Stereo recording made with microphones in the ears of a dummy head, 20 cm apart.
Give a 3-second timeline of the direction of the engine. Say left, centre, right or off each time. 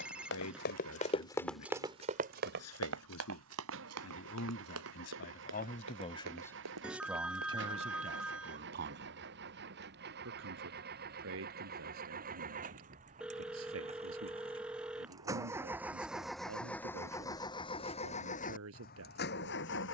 right, right, right, right, right, centre, left.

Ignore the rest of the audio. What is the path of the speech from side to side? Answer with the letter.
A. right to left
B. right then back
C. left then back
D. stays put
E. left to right
E.